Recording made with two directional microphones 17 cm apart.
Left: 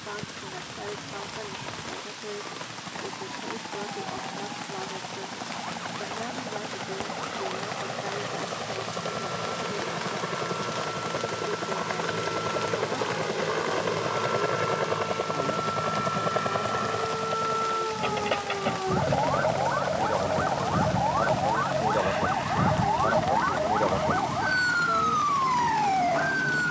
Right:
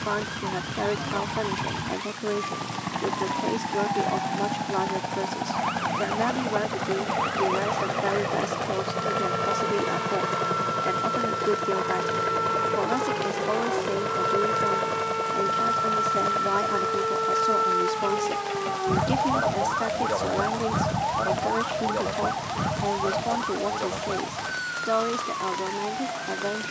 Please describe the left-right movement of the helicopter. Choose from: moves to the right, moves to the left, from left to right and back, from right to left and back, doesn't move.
moves to the left.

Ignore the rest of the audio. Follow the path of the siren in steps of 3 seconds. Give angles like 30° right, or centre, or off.
70° right, 60° right, 60° right, 60° right, 50° right, 40° right, 10° right, 20° left, 50° left.